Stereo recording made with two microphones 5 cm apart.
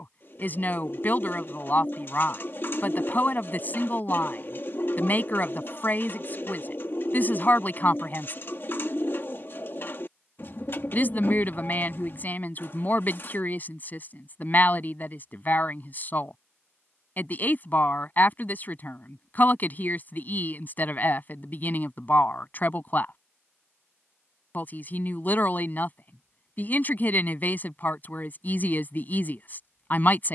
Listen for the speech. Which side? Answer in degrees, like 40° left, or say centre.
40° left.